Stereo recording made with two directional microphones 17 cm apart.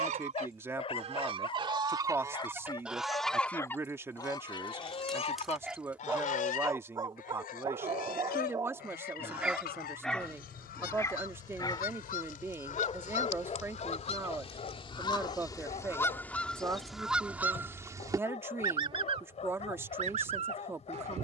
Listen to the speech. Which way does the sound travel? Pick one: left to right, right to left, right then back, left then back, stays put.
stays put.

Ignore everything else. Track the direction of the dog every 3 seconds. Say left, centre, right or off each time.
left, centre, right, centre, left, left, left.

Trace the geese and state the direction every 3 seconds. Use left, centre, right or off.
right, left, left, left, left, centre, right.